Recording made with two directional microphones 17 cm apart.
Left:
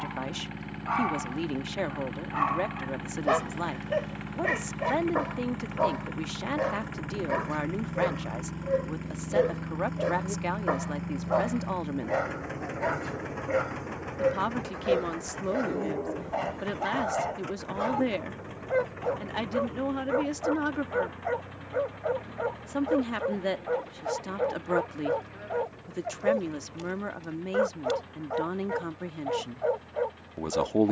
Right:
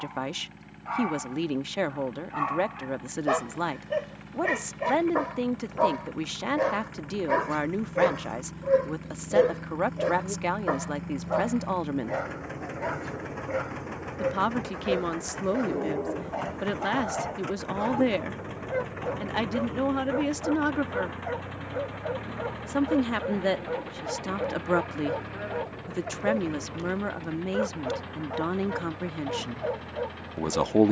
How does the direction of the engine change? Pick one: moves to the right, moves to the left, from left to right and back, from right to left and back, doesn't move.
moves to the right.